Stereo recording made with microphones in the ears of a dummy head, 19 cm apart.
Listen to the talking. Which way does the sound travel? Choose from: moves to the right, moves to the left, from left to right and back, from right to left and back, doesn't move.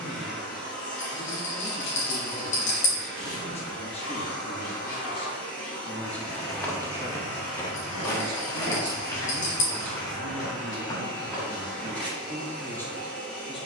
from left to right and back.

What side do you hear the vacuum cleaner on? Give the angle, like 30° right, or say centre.
10° left.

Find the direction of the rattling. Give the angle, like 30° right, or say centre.
60° left.